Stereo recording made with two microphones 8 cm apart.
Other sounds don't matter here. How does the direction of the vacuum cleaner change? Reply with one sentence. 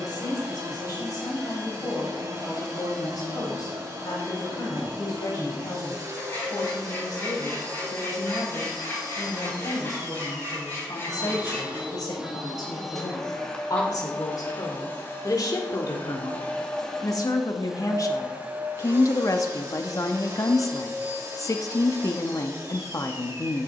In this clip you hear the vacuum cleaner move from right to left and back again.